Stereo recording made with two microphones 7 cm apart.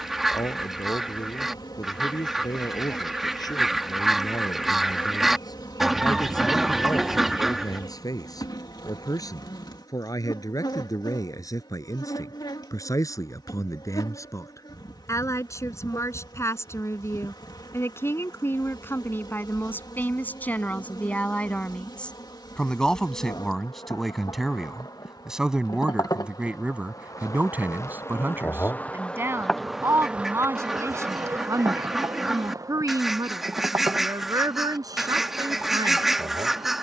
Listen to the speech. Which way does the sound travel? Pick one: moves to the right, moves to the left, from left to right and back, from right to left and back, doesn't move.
moves to the right.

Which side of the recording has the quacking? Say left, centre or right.
centre.